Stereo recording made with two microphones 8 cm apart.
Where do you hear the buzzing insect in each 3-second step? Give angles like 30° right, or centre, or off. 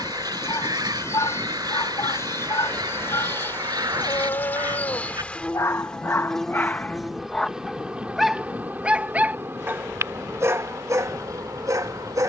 40° left, 20° left, 10° right, 40° right.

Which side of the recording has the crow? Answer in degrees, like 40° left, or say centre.
60° right.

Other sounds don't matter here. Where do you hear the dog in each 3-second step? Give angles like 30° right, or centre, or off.
60° left, 50° left, 10° left, 40° right.